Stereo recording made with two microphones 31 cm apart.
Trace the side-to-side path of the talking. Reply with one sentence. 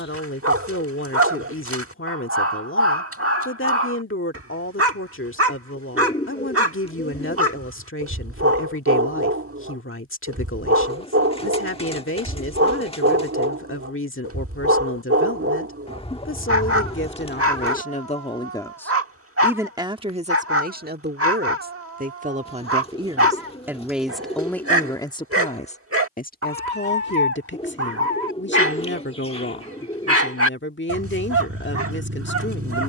You can hear the talking go right and come back.